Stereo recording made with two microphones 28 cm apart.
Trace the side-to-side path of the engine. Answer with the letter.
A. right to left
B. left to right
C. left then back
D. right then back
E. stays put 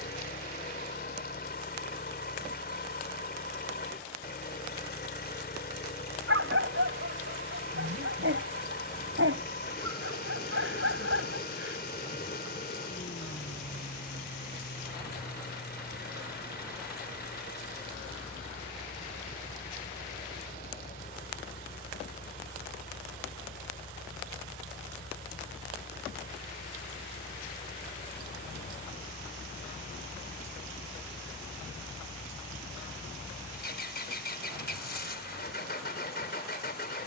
E.